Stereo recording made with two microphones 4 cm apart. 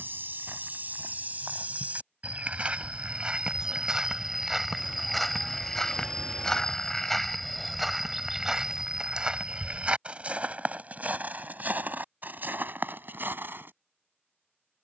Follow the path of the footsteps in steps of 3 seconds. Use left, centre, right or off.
right, centre, centre, right, right.